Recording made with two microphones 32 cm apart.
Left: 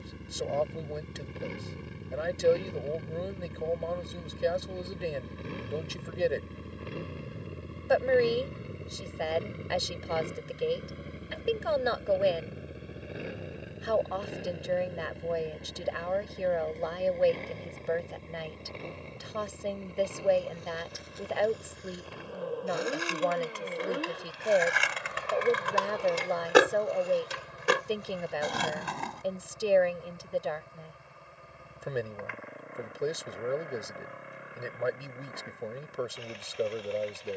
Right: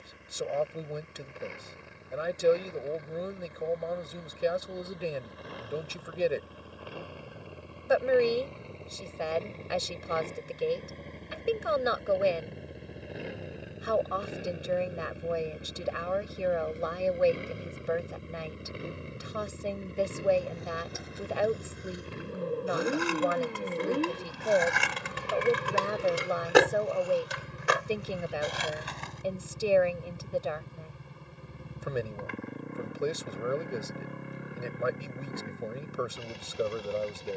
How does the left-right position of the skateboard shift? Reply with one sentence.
In this clip you hear the skateboard move to the left.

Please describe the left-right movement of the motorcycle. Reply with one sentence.
You can hear the motorcycle travel towards the right.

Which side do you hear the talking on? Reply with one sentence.
In this clip you hear the talking in the centre.